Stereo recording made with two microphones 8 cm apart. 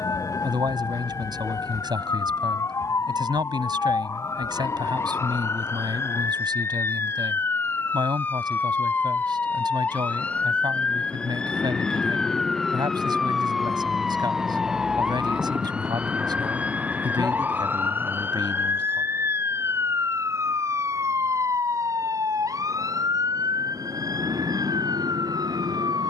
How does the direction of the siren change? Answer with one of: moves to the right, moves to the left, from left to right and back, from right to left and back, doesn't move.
moves to the right.